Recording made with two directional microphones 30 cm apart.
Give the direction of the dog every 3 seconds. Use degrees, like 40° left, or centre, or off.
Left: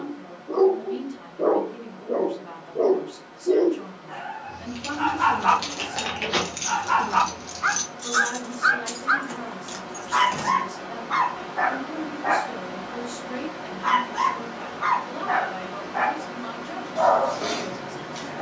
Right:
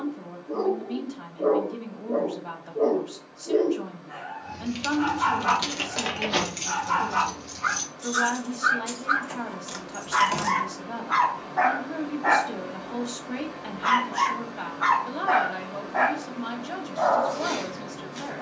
30° left, 30° left, 30° left, centre, 30° right, 10° left.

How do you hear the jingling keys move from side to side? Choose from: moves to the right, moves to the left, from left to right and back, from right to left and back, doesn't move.
from right to left and back.